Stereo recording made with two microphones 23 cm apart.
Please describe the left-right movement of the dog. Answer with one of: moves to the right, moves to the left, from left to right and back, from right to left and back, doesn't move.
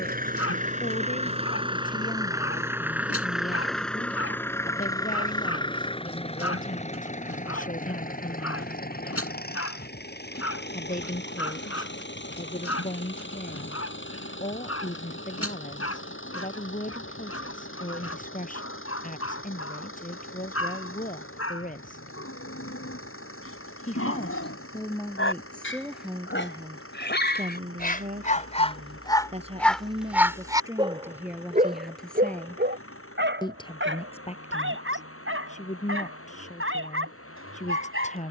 moves to the right.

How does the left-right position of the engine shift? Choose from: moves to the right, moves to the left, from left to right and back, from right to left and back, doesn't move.
moves to the left.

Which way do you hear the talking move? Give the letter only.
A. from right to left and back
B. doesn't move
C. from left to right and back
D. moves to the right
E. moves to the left
C.